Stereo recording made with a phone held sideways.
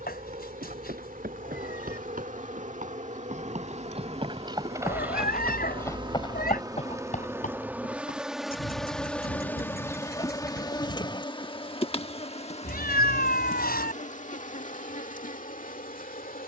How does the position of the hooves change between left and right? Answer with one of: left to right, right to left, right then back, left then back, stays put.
right to left.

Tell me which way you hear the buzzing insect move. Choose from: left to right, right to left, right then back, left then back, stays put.
right to left.